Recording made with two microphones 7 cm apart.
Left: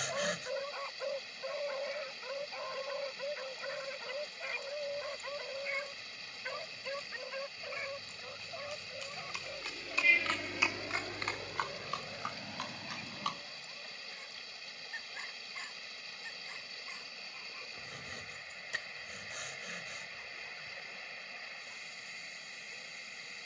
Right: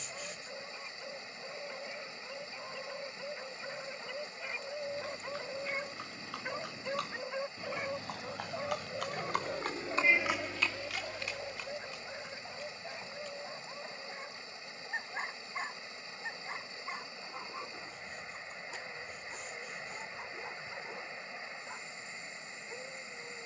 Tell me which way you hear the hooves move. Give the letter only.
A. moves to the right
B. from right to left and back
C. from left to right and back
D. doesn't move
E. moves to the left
E.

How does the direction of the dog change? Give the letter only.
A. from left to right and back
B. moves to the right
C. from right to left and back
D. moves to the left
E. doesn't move
B.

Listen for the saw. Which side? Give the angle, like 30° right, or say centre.
80° left.